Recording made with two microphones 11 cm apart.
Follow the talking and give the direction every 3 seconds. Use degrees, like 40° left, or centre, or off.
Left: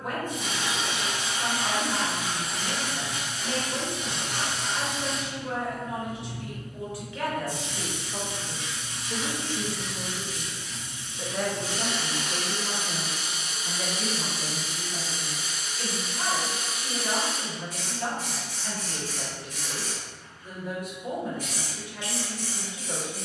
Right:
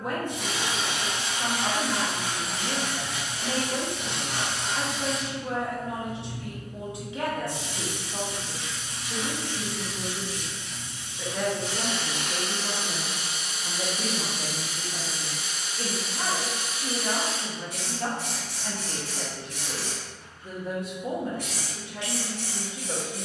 30° right, 30° right, 20° right, 10° left, 30° right, 30° right, 30° right, 30° right.